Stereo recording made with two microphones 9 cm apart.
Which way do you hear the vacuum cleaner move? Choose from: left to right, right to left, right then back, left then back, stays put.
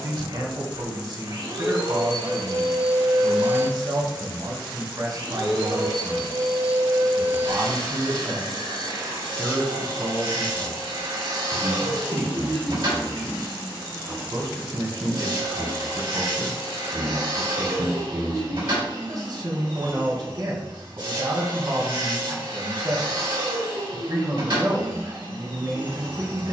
stays put.